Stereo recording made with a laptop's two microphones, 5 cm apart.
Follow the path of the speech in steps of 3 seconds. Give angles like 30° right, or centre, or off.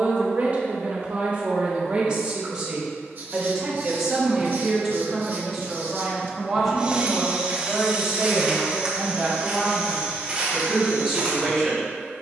30° right, 10° right, centre, 10° left.